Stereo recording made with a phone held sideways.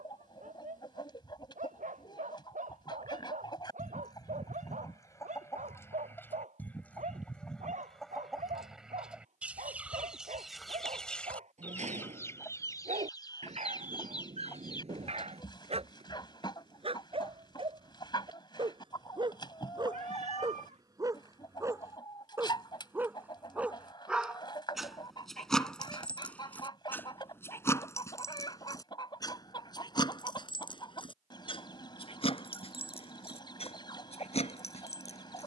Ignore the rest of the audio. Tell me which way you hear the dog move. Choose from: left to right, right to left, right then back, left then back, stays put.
right to left.